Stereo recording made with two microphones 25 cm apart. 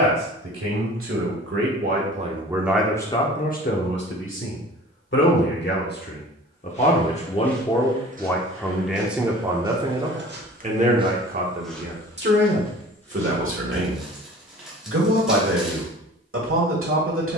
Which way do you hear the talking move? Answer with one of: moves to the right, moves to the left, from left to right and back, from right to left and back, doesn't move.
from right to left and back.